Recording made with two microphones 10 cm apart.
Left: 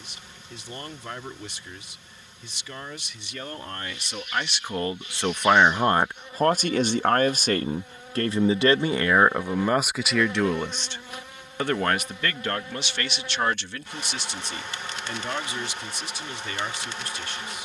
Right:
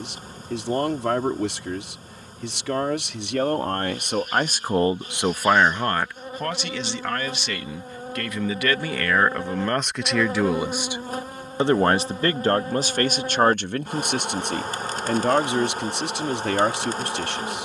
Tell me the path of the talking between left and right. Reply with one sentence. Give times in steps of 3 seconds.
You can hear the talking on the right from 0 s, on the left from 6 s, in the centre from 9 s and on the right from 12 s.